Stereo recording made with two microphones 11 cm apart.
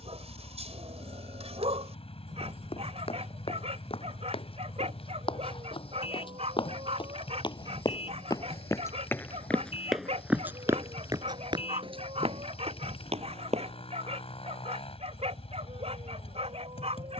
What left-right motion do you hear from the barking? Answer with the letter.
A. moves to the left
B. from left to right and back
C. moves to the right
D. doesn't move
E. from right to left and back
D.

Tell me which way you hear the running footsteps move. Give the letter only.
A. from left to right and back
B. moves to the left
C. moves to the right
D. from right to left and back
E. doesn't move
C.